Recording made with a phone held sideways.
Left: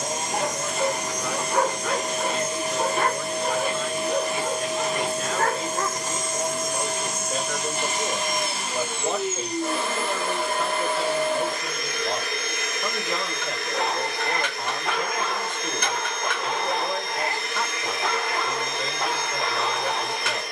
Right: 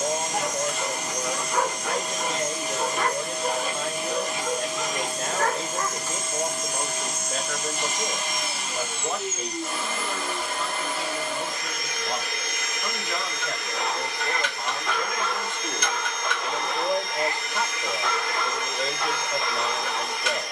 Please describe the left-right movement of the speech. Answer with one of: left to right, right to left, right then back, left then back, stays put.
left then back.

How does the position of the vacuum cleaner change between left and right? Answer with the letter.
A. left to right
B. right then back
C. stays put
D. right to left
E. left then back
C.